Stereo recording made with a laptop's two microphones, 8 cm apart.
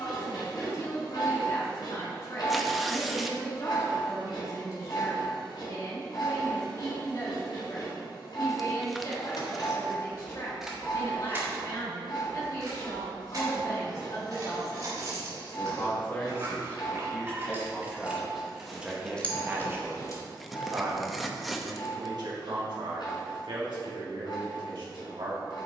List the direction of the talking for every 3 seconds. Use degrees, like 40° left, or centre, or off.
40° left, 40° left, 40° left, 40° left, 40° left, 20° left, 20° right, 60° right, 70° right.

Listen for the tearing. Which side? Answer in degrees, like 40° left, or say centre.
centre.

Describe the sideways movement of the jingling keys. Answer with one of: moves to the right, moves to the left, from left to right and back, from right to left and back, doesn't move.
from left to right and back.